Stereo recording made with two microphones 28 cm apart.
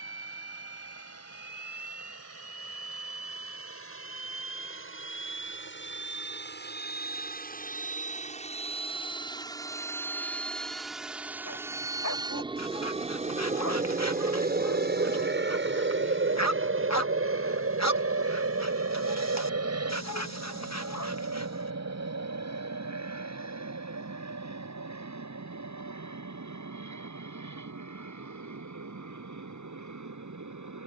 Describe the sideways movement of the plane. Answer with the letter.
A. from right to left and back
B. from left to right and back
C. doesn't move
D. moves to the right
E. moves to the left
D.